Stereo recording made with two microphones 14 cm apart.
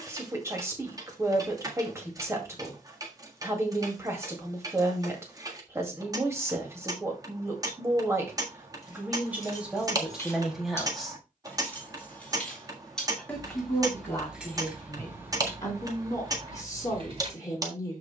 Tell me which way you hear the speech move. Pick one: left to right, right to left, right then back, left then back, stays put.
right to left.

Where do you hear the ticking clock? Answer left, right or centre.
right.